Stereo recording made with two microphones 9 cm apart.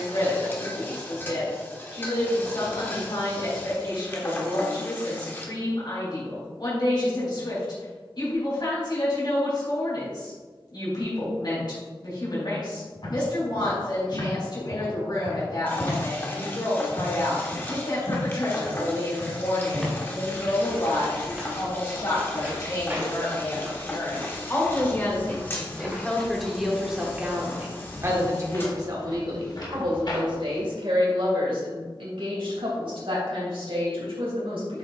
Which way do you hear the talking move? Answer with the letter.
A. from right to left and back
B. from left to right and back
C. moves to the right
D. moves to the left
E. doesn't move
C.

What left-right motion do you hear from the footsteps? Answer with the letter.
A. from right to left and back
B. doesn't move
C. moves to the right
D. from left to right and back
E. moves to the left
D.